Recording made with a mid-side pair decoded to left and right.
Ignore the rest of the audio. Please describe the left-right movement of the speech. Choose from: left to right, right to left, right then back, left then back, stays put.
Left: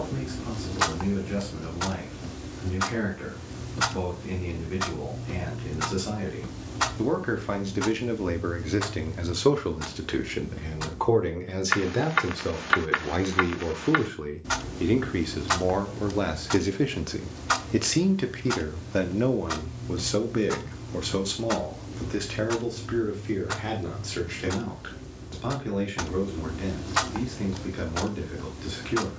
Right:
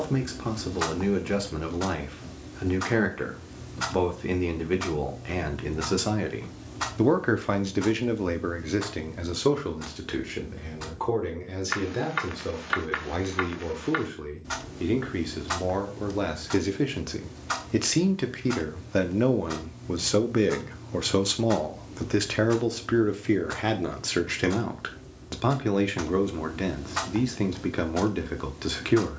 left then back.